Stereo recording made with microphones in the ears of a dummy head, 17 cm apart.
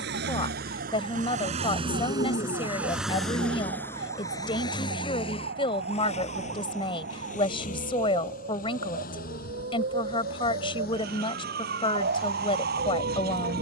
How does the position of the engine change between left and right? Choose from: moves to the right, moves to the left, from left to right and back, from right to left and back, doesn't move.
moves to the left.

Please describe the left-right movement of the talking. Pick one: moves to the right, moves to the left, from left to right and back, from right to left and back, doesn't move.
doesn't move.